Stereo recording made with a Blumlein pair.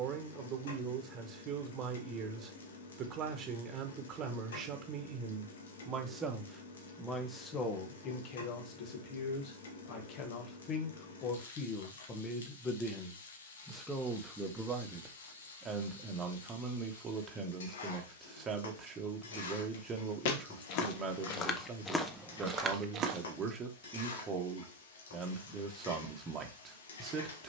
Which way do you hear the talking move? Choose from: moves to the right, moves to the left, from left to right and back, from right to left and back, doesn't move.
from right to left and back.